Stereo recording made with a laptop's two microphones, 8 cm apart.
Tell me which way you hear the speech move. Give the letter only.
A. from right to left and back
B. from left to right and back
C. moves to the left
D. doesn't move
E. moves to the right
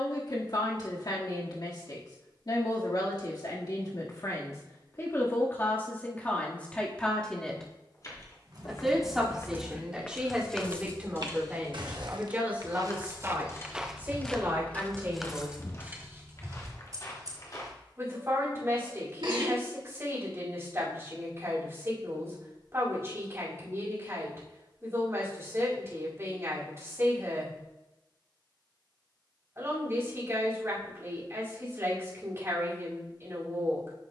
E.